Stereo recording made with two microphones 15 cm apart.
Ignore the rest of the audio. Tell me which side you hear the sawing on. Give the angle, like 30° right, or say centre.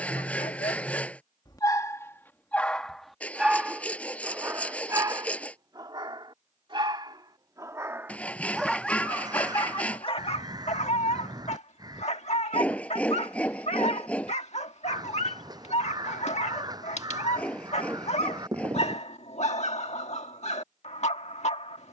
10° left.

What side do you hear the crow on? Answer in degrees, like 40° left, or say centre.
30° right.